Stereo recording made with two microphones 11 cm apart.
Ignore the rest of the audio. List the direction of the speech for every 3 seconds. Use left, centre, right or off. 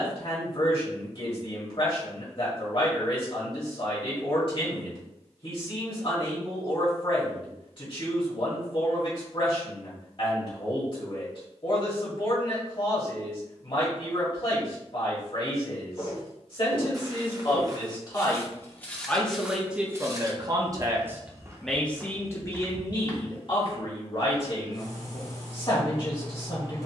left, left, left, left, left, left, centre, left, left.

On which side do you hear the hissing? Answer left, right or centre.
left.